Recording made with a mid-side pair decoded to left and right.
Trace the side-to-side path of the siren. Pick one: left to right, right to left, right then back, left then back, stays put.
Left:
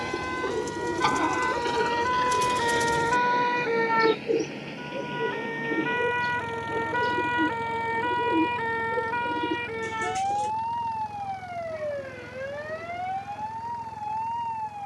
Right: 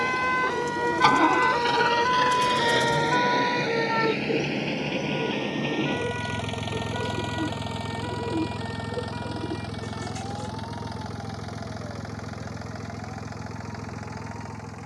right to left.